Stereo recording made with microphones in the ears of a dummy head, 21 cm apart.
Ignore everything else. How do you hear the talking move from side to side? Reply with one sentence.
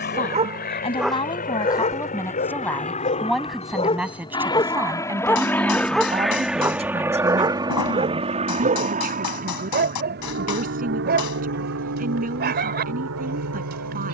In this clip you hear the talking move from left to right.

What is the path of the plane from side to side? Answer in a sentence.
You can hear the plane move from left to right.